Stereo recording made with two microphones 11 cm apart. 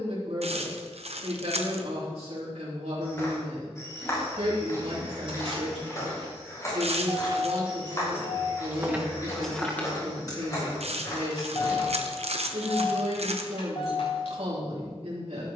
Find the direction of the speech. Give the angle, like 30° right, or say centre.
70° right.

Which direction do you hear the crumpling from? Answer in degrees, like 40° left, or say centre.
80° right.